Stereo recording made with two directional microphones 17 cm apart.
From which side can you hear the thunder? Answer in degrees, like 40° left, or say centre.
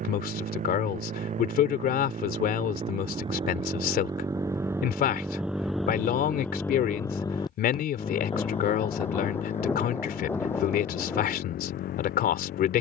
10° left.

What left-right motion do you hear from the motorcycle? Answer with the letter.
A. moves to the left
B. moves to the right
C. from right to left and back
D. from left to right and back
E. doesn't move
A.